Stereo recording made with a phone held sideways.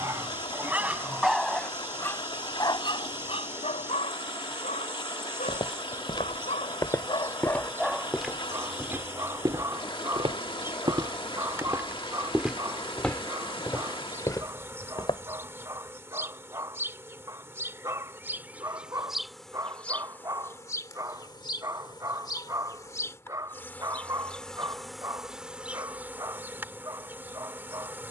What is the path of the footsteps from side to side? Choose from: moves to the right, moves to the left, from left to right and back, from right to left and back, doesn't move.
from left to right and back.